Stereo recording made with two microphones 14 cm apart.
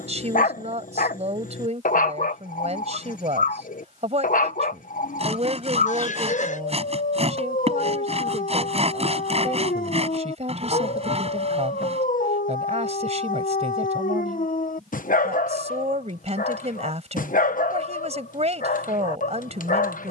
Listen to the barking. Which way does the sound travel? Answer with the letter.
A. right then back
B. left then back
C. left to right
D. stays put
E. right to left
D.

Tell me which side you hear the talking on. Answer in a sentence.
You can hear the talking on the right.